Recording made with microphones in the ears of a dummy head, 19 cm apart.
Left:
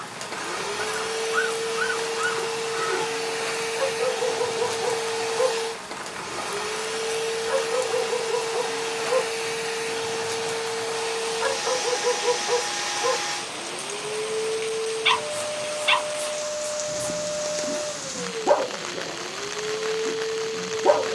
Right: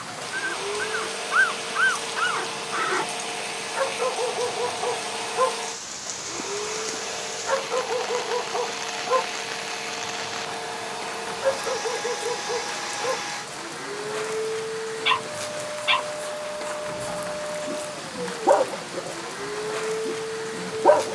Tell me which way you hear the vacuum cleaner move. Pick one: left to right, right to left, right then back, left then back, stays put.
stays put.